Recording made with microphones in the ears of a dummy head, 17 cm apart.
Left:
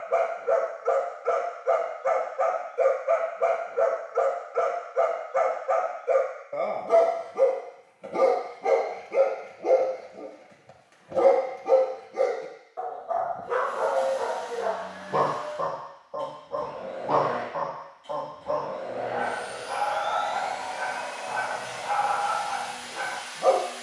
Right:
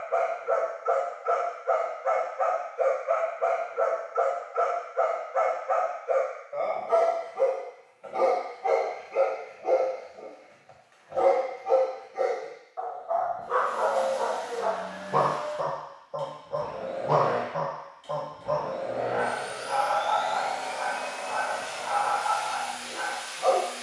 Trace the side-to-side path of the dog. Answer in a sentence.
In this clip you hear the dog go right and come back.